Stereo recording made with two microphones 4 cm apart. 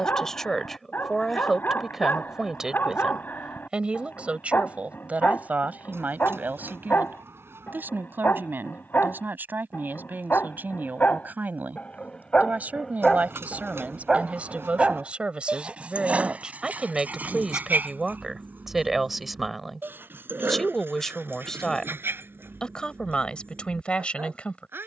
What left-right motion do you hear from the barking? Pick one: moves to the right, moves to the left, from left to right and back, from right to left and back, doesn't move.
moves to the right.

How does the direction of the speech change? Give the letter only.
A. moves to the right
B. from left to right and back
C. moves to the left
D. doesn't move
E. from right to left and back
B.